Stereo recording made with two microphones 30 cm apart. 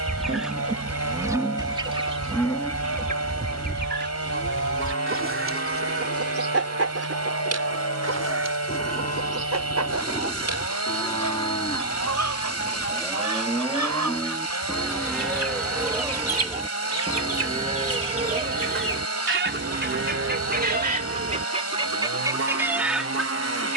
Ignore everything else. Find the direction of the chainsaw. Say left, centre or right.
left.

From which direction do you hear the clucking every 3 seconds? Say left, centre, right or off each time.
centre, right, right, right, right, right, right, centre.